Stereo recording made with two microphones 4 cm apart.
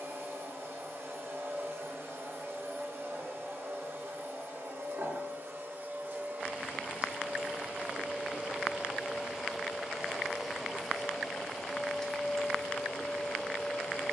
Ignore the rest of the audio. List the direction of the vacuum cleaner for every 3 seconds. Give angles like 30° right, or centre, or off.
70° right, 70° right, 40° right, 10° right, 10° left.